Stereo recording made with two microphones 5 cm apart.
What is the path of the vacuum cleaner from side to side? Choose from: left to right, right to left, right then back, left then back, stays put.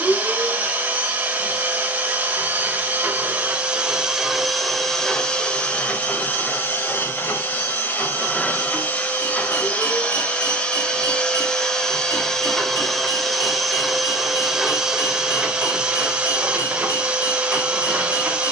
left then back.